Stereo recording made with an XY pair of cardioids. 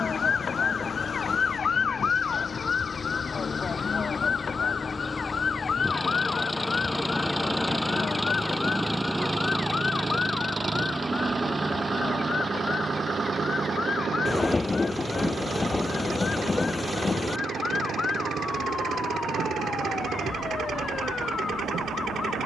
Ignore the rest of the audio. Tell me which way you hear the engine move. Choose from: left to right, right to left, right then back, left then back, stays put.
left to right.